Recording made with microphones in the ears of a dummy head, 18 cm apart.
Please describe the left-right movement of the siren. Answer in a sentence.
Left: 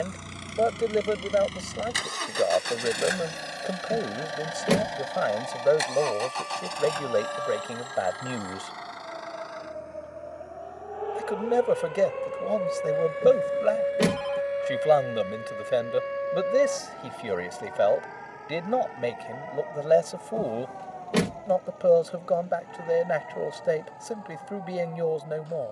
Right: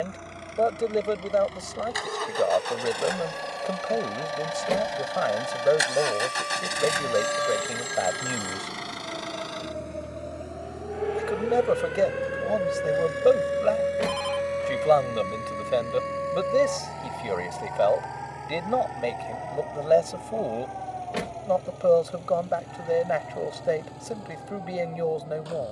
You can hear the siren move from right to left.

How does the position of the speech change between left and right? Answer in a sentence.
In this clip you hear the speech stay put.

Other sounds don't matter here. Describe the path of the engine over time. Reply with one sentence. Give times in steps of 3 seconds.
In this clip you hear the engine on the left from 0 s, in the centre from 3 s and on the right from 6 s.